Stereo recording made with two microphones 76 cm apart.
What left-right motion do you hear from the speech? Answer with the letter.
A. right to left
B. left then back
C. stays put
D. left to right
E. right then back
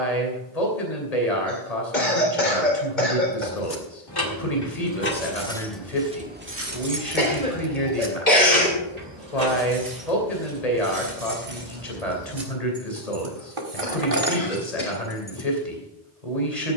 C.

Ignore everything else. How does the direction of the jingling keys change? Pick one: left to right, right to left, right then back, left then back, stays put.
right then back.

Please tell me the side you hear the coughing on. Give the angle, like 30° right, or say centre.
80° left.